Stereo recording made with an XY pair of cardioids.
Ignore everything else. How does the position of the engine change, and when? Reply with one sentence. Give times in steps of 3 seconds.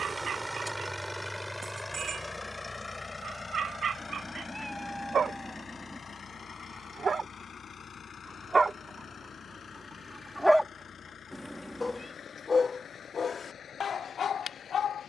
In this clip you hear the engine in the centre from 0 s and on the left from 3 s.